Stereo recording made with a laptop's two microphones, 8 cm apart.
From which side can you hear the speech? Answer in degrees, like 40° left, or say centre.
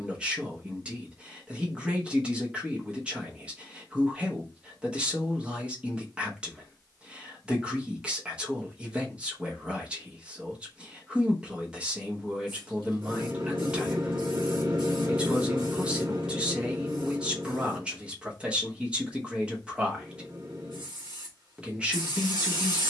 10° right.